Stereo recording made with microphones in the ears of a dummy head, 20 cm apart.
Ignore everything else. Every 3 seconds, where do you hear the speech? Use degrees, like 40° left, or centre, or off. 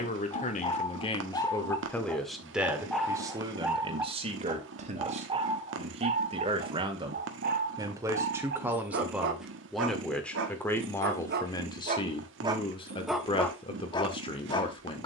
10° left, 30° right, 20° right, 10° left, 20° left.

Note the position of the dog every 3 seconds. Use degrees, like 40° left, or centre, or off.
10° left, 10° right, 40° right, 50° right, centre.